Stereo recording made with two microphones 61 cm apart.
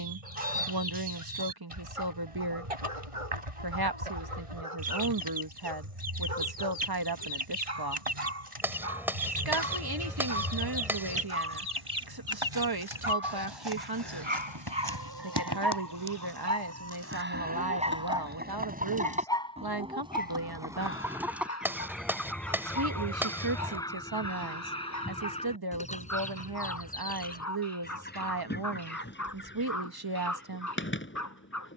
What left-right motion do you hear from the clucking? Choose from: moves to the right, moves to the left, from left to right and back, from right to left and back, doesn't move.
moves to the left.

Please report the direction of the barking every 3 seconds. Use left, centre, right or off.
right, right, right, right, right, right, centre, left, left, left, left.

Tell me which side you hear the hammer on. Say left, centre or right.
centre.